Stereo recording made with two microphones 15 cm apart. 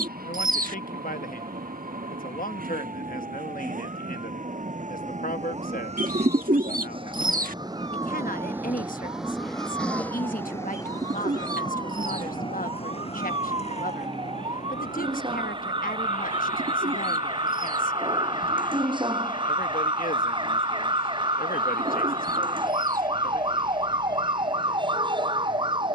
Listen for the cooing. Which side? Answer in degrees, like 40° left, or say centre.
60° right.